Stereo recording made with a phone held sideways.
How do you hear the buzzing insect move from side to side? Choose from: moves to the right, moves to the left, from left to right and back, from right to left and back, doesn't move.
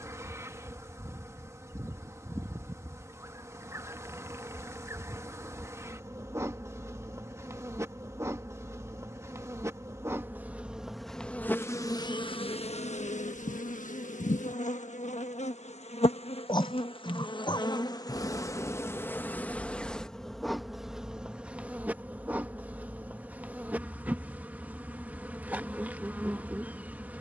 from right to left and back.